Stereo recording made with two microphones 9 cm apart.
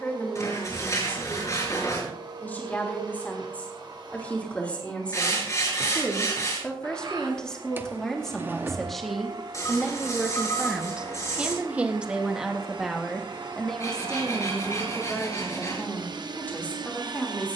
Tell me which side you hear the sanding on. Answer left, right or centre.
left.